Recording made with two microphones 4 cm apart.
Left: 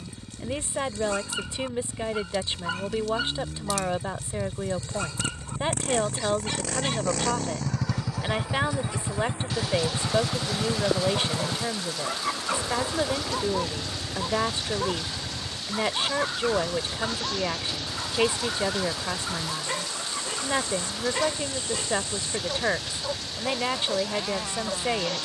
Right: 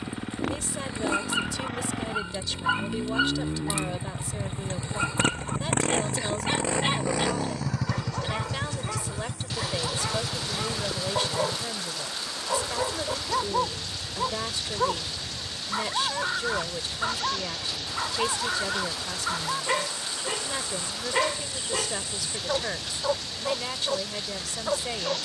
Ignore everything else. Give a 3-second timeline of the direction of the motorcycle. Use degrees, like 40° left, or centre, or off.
70° right, 60° right, 10° right, 40° left, 60° left, 70° left, 70° left, 70° left, 70° left.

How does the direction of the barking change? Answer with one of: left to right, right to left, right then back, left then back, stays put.
stays put.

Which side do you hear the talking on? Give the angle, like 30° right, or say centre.
30° left.